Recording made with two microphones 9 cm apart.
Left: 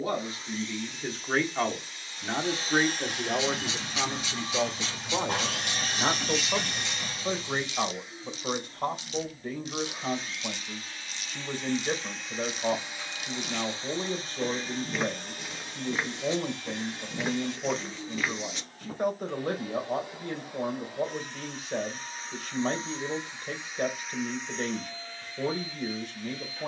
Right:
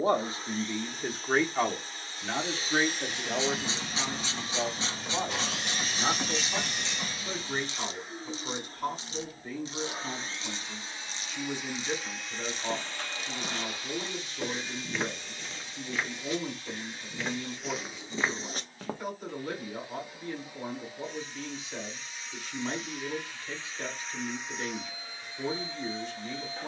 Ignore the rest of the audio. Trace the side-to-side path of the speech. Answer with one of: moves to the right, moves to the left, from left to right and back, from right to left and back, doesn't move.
moves to the left.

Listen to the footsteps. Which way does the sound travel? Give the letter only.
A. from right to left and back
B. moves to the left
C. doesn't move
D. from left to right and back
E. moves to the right
A.